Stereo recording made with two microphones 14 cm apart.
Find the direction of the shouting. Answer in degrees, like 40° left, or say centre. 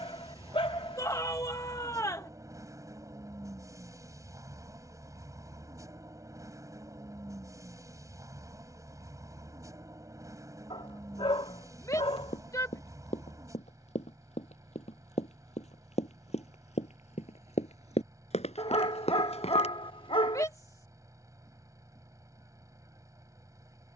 20° left.